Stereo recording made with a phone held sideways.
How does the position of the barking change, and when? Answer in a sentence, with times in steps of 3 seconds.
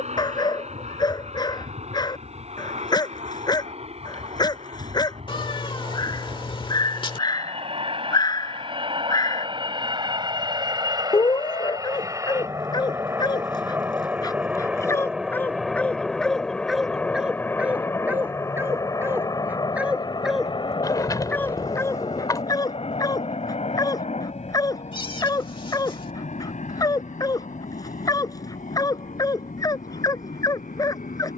In this clip you hear the barking on the left from 0 s, in the centre from 15 s and on the left from 21 s.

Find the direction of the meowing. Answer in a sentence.
In this clip you hear the meowing on the left.